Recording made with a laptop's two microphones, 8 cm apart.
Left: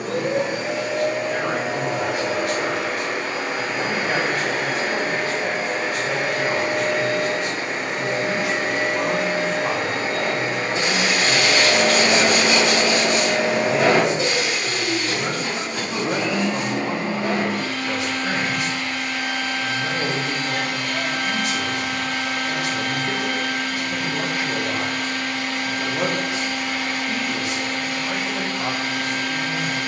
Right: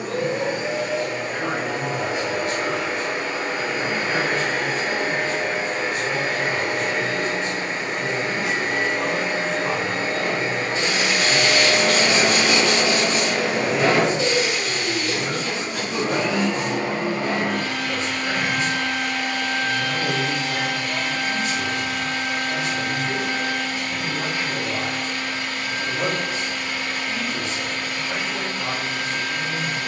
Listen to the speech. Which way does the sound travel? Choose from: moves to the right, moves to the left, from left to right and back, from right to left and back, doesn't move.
doesn't move.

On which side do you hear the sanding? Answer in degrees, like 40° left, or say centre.
50° left.